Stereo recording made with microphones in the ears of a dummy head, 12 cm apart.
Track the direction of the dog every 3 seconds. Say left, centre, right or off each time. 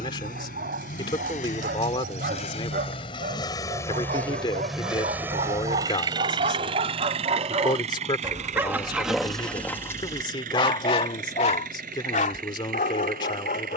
right, right, right, left, left.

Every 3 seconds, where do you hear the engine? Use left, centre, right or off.
left, centre, right, right, right.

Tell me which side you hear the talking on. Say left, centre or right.
left.